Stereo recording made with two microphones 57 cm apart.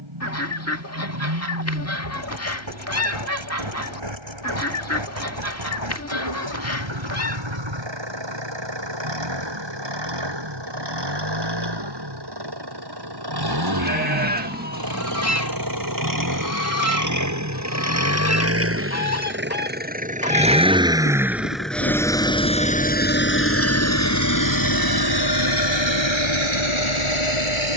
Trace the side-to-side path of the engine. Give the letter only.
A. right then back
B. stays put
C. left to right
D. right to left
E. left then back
D.